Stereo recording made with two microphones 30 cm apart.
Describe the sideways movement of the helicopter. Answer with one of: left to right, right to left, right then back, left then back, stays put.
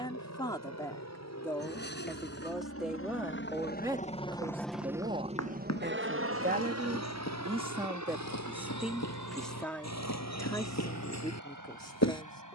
left to right.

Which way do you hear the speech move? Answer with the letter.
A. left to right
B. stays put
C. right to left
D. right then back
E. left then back
D.